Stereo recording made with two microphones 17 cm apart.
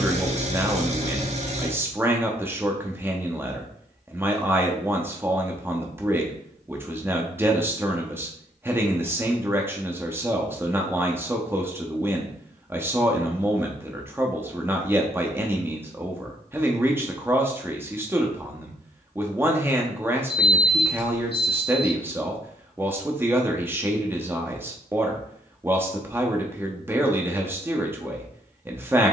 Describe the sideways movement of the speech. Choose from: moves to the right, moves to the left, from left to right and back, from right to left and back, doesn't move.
doesn't move.